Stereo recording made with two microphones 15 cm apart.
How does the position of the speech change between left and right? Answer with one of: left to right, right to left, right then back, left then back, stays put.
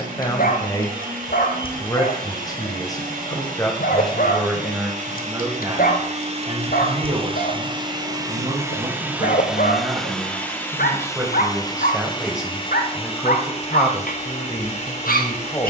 right then back.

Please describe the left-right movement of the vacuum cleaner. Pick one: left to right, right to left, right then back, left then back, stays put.
right to left.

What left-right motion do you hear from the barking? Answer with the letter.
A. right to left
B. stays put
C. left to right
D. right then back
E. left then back
B.